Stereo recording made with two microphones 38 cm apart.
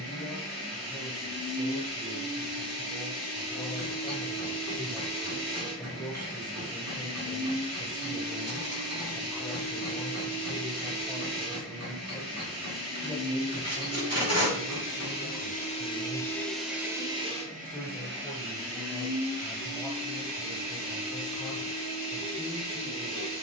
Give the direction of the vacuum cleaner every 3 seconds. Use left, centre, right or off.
left, left, left, left, left, centre, right, right.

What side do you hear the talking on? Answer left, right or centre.
centre.